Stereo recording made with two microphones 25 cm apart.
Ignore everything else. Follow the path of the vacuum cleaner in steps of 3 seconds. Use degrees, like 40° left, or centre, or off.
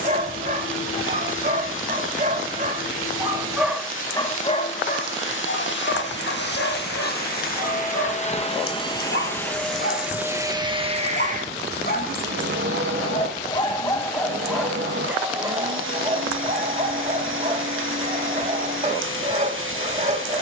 60° left, 50° left, 40° left, 10° right, 50° right, 60° right, 60° right.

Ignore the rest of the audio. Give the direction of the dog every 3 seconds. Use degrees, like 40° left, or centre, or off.
30° right, 20° left, 60° left, 50° left, 20° left, 20° right, 30° right.